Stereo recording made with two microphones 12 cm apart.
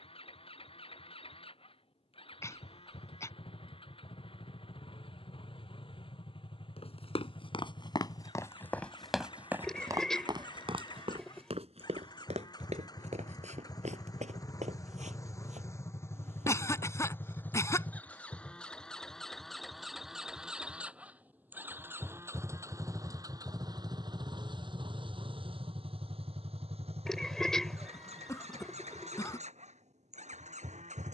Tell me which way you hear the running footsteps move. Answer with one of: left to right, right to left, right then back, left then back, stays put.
left to right.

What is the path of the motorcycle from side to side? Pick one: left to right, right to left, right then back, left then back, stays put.
left to right.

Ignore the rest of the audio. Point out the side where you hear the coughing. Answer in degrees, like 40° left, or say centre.
20° left.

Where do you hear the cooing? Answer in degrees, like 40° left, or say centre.
centre.